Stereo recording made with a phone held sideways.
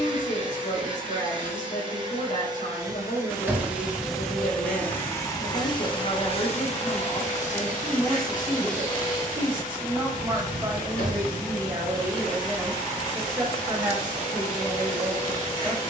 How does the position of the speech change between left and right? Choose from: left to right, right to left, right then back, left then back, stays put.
left to right.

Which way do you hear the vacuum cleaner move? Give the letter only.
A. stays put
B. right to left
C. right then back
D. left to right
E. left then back
B.